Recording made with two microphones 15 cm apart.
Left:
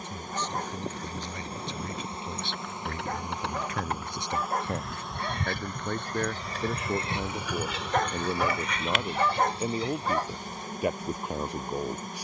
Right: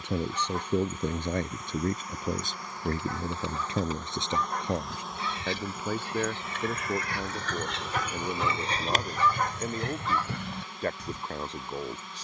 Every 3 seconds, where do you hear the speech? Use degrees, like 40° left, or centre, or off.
50° right, 20° right, centre, 10° left.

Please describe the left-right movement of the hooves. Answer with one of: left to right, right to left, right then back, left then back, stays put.
left to right.